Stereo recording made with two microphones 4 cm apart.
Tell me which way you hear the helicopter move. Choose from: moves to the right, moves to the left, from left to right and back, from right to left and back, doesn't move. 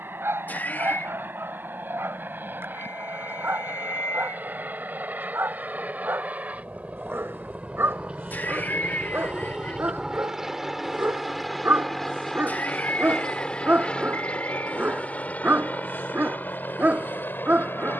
moves to the left.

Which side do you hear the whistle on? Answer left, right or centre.
left.